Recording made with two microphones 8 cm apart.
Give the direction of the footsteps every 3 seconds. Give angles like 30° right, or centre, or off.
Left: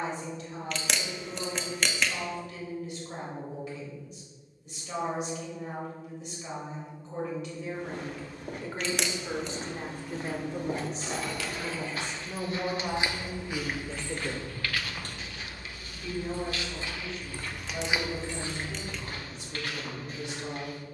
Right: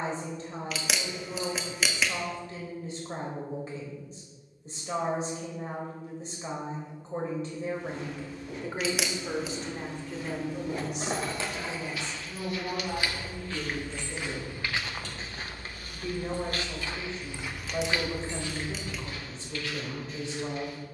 off, off, 70° left, 60° left, 10° left, 30° right, 50° left.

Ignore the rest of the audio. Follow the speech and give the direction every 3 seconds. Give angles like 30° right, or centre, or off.
40° right, 40° right, 30° right, 20° left, 60° left, 30° right, 30° right.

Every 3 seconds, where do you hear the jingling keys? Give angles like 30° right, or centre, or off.
off, off, off, 30° right, 40° left, 30° left, 50° right.